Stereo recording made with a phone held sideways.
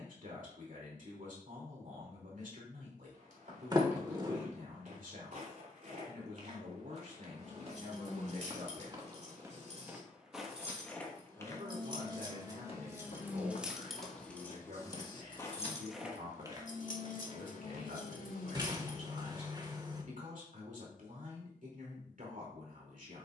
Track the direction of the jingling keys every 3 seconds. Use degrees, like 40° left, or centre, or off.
off, off, 50° right, 40° right, 10° right, 50° left, 70° left, off.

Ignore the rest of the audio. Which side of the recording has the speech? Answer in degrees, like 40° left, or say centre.
60° right.